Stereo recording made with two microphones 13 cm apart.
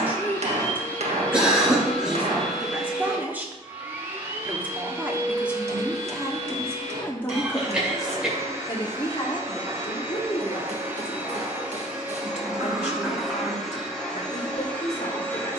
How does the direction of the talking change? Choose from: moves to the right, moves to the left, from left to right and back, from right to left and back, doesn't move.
moves to the left.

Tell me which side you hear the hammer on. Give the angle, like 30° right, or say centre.
60° right.